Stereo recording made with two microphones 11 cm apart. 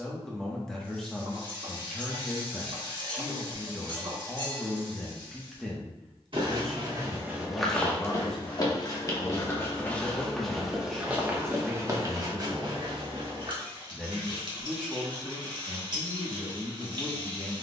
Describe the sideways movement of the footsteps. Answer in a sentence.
You can hear the footsteps go left and come back.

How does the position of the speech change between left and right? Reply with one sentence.
You can hear the speech stay in one place.